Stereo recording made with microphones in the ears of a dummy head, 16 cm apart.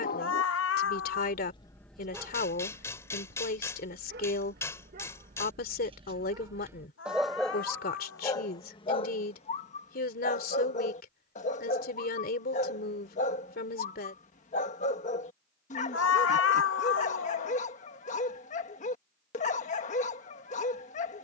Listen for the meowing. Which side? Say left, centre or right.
left.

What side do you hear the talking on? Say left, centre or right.
left.